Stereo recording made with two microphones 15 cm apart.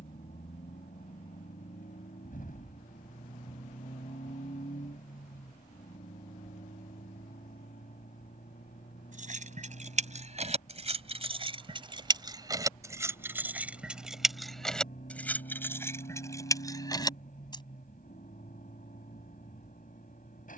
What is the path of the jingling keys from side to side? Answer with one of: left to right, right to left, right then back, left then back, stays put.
right to left.